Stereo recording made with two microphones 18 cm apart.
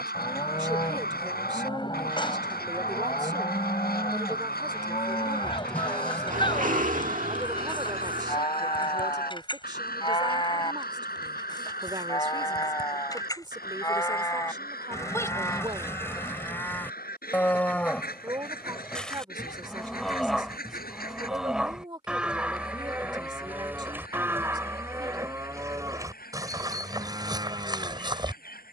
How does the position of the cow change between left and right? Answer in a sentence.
In this clip you hear the cow move to the right.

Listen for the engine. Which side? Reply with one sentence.
You can hear the engine on the right.